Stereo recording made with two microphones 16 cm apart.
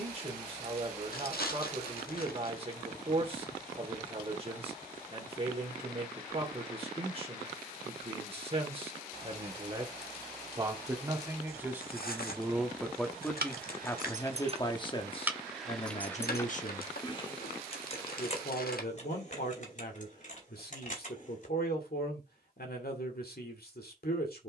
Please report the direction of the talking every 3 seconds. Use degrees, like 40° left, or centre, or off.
40° right, 40° right, 40° right, 20° right, 10° left, 40° left, 70° left, 70° left.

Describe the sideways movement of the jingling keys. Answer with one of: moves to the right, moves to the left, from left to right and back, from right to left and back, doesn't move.
moves to the left.